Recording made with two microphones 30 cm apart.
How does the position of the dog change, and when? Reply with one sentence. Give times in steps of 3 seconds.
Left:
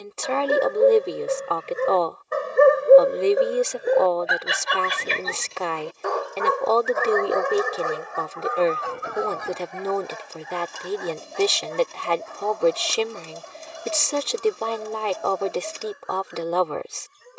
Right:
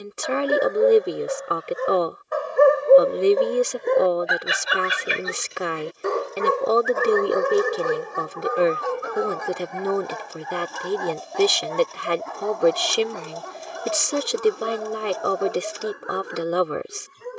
You can hear the dog on the left from 0 s, in the centre from 3 s and on the right from 6 s.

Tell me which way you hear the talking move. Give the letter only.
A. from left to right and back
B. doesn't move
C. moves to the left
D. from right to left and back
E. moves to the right
B.